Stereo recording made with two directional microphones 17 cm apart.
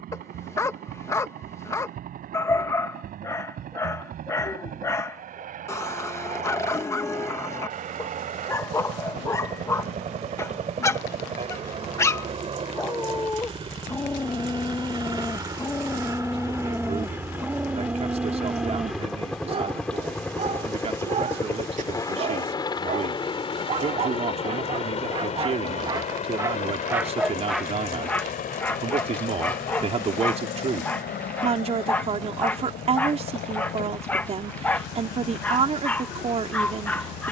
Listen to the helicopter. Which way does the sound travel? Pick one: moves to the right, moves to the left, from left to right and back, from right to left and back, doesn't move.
moves to the left.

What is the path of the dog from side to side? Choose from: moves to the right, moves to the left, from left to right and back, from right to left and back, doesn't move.
from left to right and back.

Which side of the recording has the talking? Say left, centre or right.
right.